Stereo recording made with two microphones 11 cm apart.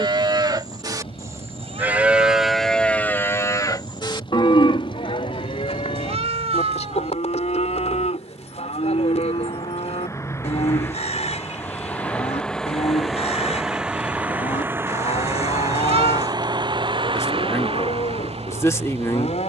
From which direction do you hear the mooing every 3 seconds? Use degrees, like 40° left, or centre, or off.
20° right, 50° left, 70° left, 70° left, 70° left, 70° left, 70° left.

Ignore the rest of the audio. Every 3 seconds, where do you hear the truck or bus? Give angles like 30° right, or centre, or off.
50° left, 50° left, 40° left, 20° left, centre, 40° right, 60° right.